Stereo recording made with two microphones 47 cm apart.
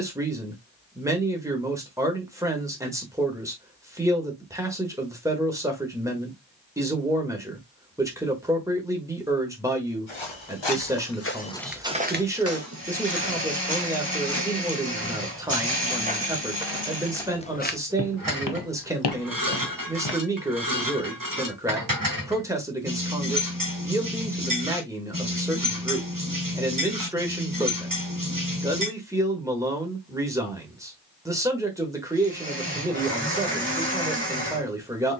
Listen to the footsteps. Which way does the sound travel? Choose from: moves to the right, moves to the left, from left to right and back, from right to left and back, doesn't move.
from left to right and back.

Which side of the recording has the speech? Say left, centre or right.
centre.